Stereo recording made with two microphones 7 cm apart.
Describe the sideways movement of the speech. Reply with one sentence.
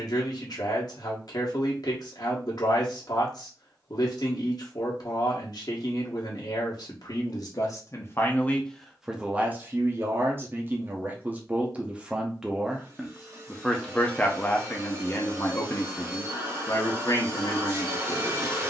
You can hear the speech move from left to right and back again.